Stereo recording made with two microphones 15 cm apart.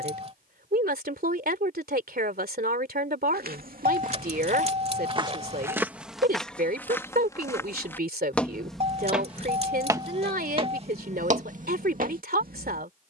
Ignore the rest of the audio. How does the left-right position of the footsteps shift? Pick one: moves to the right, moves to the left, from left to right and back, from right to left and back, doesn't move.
from right to left and back.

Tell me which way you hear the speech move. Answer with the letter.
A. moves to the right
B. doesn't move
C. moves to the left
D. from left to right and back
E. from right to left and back
B.